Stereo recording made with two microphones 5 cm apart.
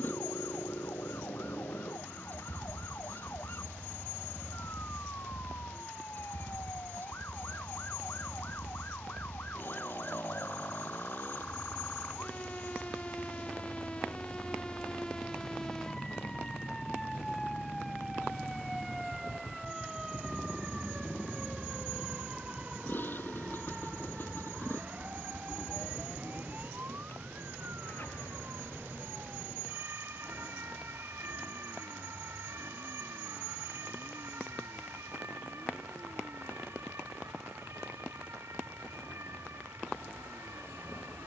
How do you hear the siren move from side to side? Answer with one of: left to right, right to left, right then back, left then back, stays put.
left to right.